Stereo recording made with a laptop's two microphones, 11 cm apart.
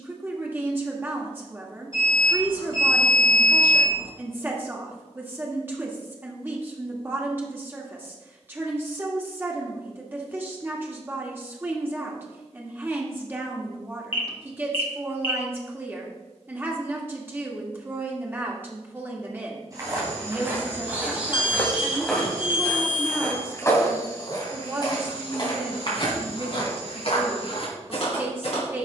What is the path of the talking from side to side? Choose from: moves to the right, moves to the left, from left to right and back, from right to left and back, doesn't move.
doesn't move.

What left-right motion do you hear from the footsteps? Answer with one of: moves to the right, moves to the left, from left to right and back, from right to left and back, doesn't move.
moves to the left.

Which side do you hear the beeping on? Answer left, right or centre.
left.